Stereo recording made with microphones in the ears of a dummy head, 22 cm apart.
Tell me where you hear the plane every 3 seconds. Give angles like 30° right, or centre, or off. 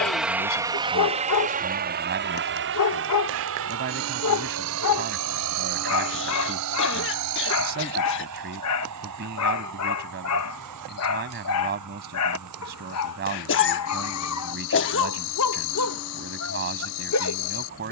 30° right, 60° right, 70° right, 70° right, 80° right, 80° right.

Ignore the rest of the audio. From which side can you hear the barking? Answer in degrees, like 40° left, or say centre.
70° left.